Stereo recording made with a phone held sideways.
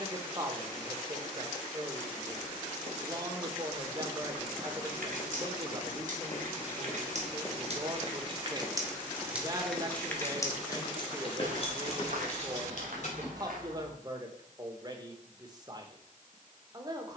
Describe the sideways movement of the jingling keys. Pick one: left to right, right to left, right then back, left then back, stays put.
right to left.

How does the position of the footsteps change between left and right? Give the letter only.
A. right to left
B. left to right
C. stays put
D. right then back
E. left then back
E.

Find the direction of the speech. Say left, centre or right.
right.